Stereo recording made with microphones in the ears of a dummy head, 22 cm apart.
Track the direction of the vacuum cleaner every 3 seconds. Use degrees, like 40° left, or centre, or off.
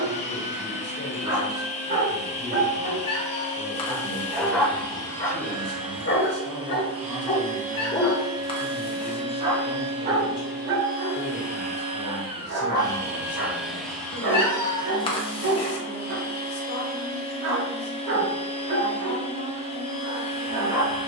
30° left, 20° left, 30° right, 40° right, centre, 20° left, 20° left.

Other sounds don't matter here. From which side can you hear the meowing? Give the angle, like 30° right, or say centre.
20° left.